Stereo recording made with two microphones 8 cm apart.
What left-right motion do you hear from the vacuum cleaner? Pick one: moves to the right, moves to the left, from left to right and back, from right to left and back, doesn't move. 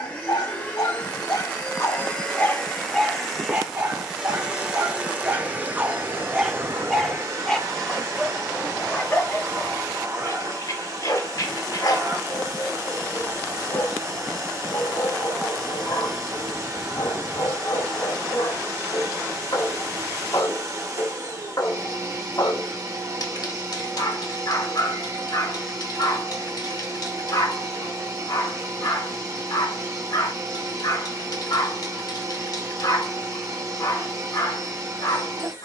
moves to the right.